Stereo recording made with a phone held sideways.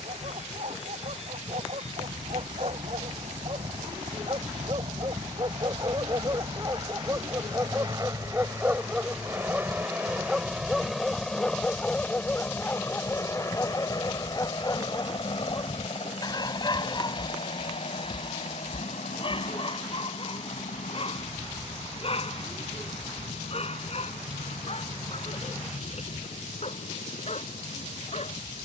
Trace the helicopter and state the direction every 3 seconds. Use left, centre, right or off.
right, right, right, centre, left, left, left, left, left, left.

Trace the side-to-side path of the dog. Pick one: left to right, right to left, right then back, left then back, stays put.
right to left.